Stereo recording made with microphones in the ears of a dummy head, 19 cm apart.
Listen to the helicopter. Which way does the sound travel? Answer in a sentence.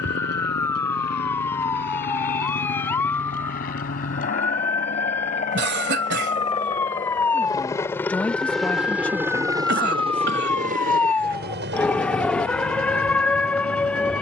You can hear the helicopter move from left to right.